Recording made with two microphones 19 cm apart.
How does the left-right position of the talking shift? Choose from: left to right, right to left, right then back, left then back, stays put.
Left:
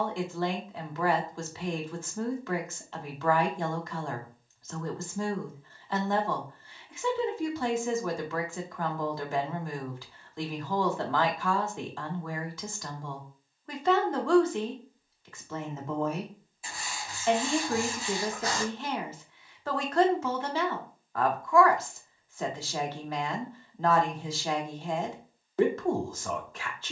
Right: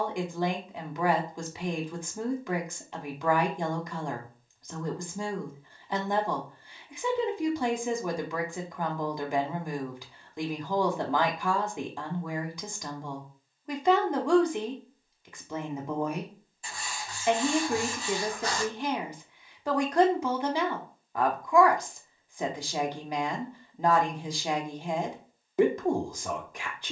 stays put.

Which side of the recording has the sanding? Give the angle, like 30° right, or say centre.
10° left.